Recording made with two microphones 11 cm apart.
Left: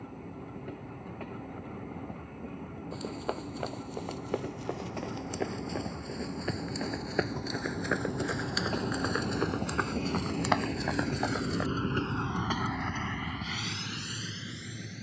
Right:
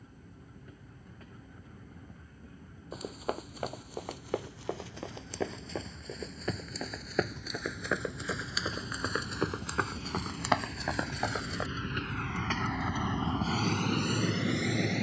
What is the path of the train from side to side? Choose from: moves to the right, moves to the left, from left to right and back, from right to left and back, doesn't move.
moves to the right.